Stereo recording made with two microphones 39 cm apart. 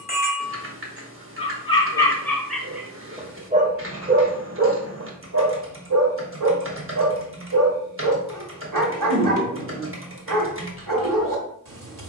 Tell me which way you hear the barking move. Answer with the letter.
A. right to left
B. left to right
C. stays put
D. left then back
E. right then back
B.